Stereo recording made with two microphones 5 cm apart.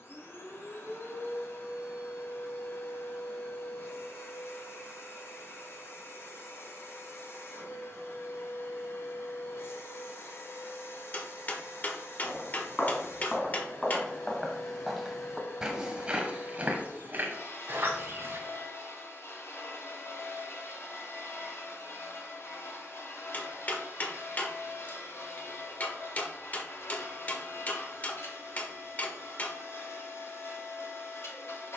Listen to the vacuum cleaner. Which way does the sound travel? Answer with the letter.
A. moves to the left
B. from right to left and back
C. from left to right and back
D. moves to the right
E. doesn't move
E.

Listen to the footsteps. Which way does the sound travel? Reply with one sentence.
You can hear the footsteps move from left to right.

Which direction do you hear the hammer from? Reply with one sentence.
You can hear the hammer on the left.